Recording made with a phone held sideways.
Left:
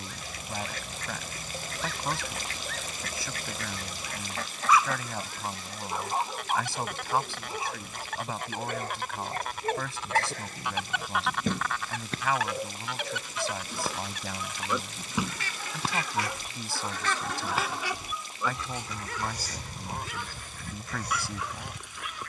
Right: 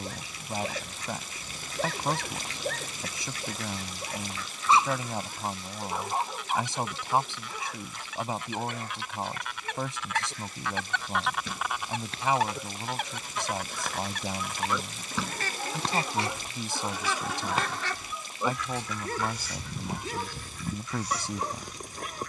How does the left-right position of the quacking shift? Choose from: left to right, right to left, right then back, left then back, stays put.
right then back.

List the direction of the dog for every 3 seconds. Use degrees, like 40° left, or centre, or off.
50° right, 30° right, 20° left, 50° left, 30° left, centre, 40° right, 40° right.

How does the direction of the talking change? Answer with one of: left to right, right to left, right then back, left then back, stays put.
stays put.